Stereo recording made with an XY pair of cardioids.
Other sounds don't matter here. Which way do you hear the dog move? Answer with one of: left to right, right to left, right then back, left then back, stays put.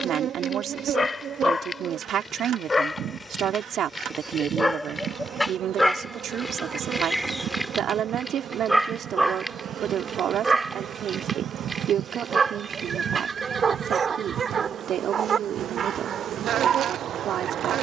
left to right.